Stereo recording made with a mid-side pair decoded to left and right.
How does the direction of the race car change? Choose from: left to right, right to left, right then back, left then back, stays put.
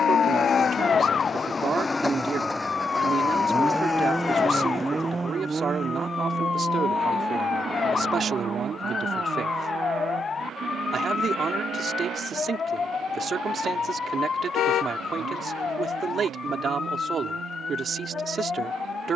left to right.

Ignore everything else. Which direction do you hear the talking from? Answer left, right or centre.
right.